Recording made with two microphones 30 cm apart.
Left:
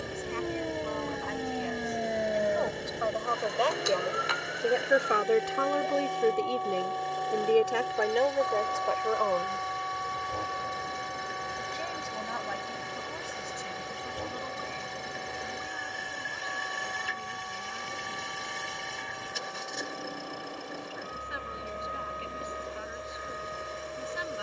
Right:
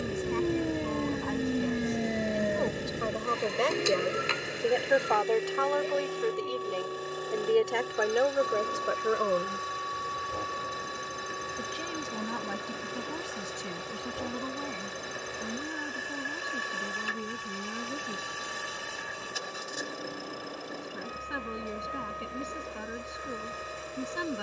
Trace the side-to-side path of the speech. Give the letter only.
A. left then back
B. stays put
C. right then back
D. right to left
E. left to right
A.